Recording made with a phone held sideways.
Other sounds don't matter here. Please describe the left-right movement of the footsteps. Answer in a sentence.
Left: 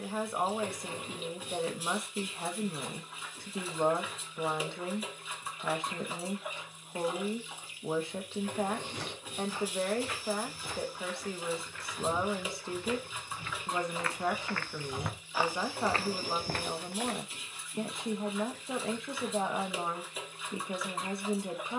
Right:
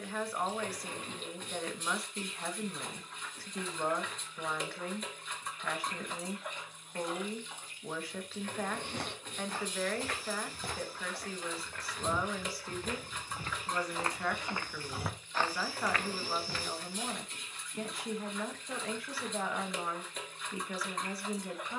In this clip you hear the footsteps move to the left.